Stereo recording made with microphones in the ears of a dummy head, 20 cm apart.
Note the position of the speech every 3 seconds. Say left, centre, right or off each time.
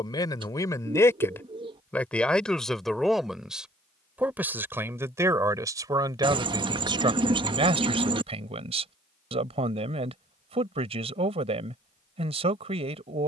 centre, centre, right, right, right.